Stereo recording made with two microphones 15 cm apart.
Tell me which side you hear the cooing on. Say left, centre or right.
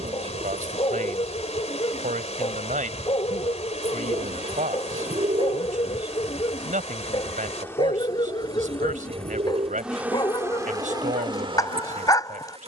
right.